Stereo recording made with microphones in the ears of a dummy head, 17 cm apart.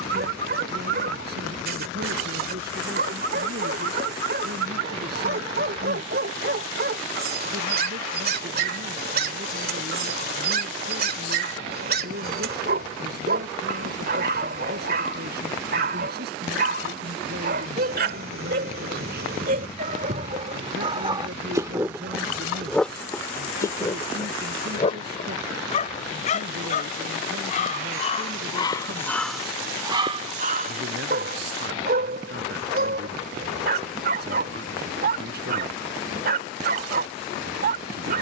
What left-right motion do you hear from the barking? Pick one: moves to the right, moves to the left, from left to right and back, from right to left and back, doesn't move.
from right to left and back.